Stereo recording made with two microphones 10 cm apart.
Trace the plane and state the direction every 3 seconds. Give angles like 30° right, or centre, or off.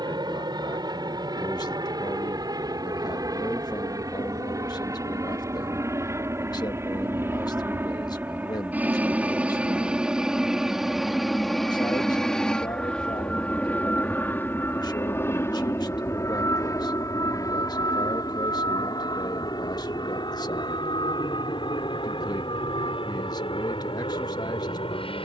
50° right, 40° right, 20° right, 10° right, 10° left, 30° left, 40° left, 50° left, 60° left.